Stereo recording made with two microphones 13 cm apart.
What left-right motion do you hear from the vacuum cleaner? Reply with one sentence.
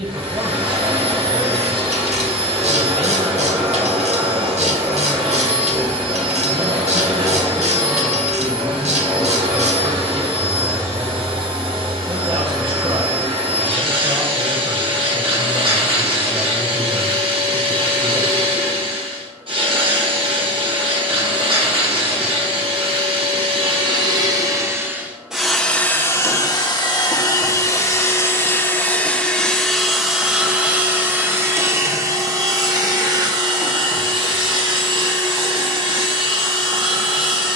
In this clip you hear the vacuum cleaner move from right to left and back again.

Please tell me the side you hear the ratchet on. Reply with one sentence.
In this clip you hear the ratchet on the right.